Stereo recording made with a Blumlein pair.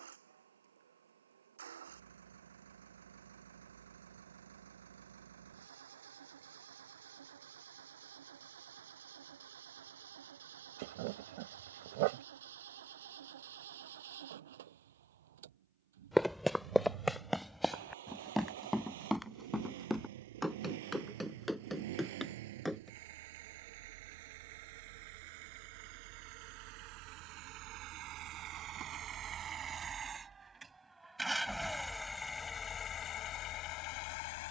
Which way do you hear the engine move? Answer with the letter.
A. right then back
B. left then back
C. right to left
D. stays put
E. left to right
C.